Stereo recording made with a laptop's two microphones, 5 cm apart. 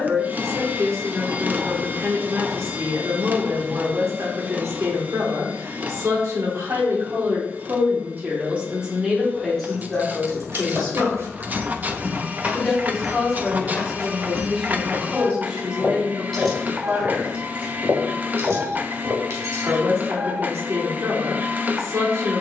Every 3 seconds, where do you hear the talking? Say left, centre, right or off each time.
right, right, right, centre, centre, right, right, right.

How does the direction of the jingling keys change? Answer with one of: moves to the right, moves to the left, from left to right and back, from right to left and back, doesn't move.
from right to left and back.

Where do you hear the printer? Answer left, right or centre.
right.